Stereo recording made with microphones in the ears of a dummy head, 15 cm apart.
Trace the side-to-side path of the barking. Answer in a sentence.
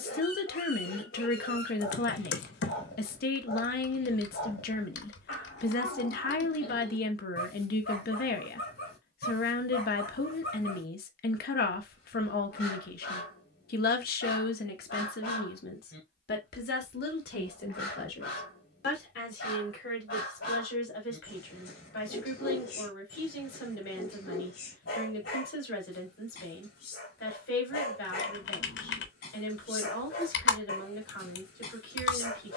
In this clip you hear the barking stay put.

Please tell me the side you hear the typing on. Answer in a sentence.
You can hear the typing on the left.